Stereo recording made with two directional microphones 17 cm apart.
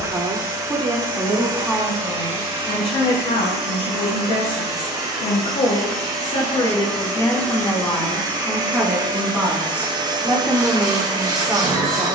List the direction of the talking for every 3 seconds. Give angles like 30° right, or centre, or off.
centre, 50° left, 20° left, 10° right.